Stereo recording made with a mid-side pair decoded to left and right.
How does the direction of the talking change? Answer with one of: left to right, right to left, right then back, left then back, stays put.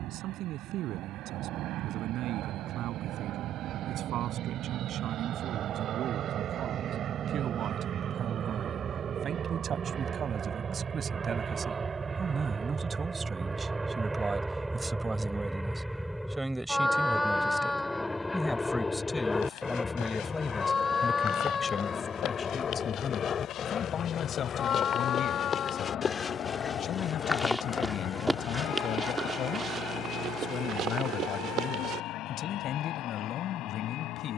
right to left.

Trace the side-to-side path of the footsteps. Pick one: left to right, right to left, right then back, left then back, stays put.
left to right.